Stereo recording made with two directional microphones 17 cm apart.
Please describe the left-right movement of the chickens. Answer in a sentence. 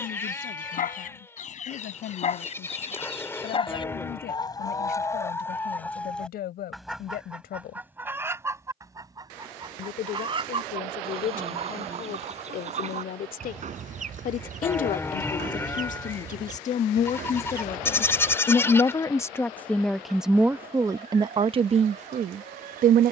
In this clip you hear the chickens go from the left side to the right.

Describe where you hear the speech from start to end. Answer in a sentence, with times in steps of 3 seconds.
In this clip you hear the speech on the left from 0 s, in the centre from 18 s and on the right from 21 s.